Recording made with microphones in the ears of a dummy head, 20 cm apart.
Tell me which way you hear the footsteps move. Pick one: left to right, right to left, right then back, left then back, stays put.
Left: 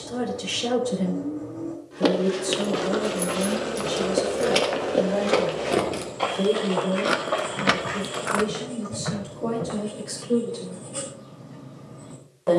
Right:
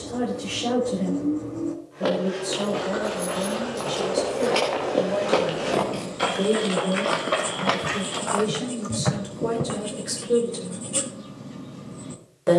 left to right.